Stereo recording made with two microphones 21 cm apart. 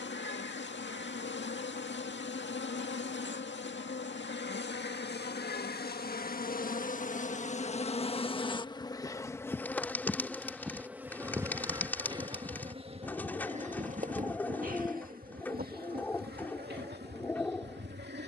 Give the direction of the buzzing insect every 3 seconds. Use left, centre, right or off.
left, left, left, centre, right, right.